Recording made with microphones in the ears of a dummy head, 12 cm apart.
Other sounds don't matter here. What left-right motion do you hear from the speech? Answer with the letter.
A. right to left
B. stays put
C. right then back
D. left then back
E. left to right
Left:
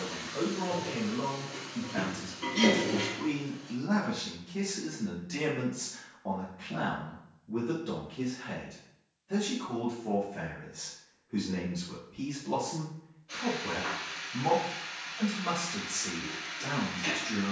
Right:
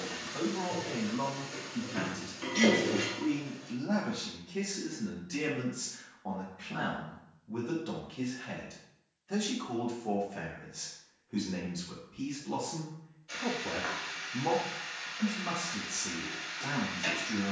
C.